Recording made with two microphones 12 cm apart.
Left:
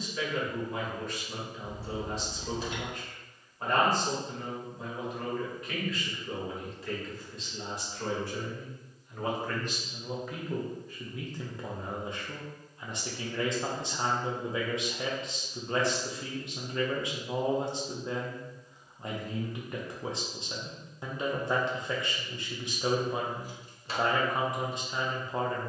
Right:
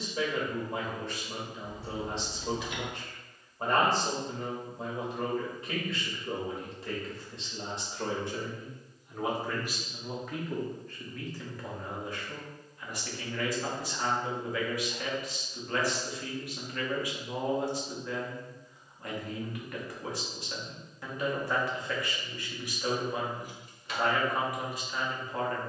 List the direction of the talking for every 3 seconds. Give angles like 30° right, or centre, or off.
30° right, 30° right, 30° right, 10° left, 20° left, 20° left, 20° left, 20° left, 20° left.